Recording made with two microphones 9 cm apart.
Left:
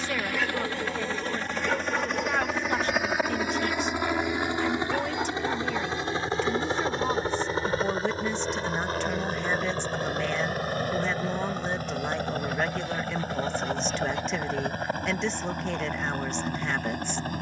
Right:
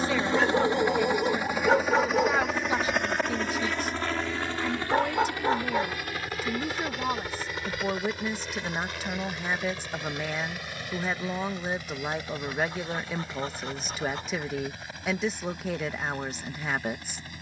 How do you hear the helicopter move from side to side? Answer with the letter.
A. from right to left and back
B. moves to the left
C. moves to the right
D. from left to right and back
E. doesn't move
B.